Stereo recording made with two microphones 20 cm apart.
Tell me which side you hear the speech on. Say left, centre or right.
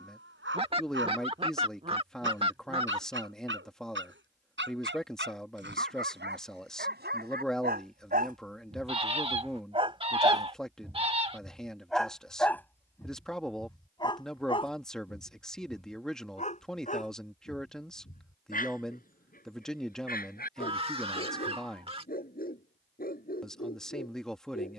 centre.